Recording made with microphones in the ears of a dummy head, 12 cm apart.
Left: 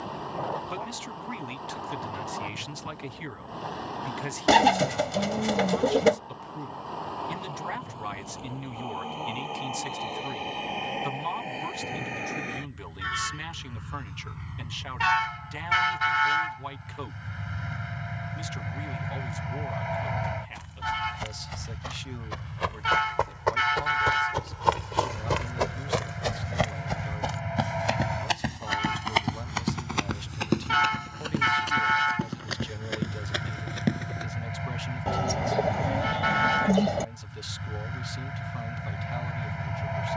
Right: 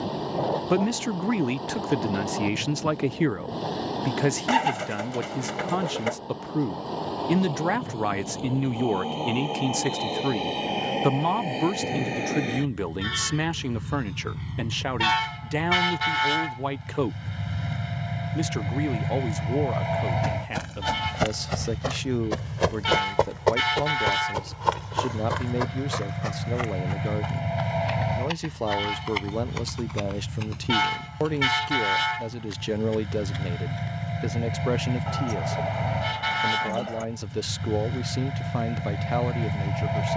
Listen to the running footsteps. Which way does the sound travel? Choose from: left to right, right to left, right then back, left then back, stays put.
right to left.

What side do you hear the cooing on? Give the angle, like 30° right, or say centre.
40° left.